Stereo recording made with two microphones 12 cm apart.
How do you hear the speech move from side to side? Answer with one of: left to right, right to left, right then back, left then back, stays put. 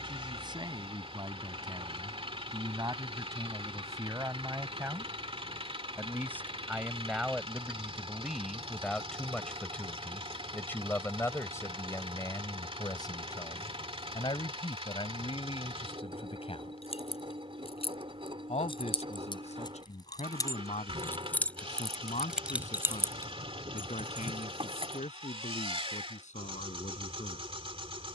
right to left.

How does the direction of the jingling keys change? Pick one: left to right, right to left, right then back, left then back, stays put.
left to right.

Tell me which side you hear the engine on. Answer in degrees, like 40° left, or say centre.
50° right.